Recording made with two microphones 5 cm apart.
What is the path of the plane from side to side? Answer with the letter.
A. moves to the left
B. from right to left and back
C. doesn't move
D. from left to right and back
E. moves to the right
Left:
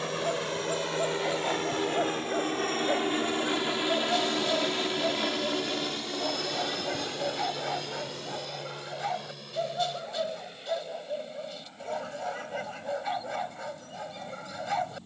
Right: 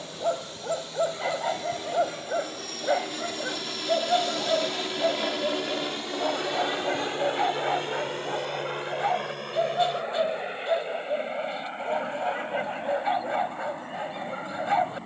E.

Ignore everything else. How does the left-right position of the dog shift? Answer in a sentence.
You can hear the dog stay put.